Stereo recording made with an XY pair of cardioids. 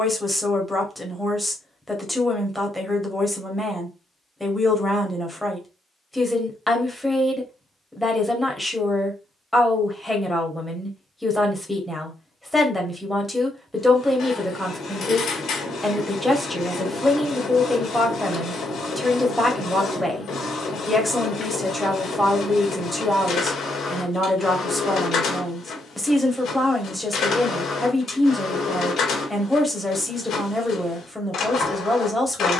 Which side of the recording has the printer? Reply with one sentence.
You can hear the printer on the left.